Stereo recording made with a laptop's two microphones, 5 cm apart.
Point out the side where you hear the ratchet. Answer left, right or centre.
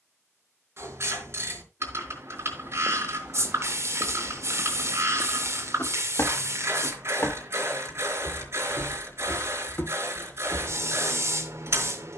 right.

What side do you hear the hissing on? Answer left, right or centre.
right.